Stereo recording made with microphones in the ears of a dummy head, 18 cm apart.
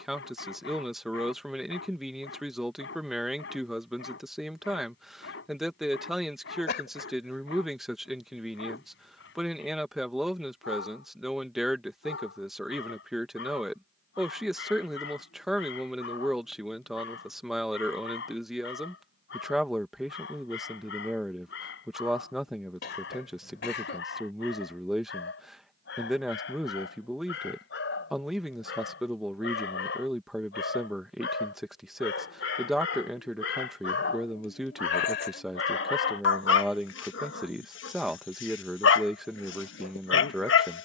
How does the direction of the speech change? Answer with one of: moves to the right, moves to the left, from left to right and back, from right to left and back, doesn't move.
doesn't move.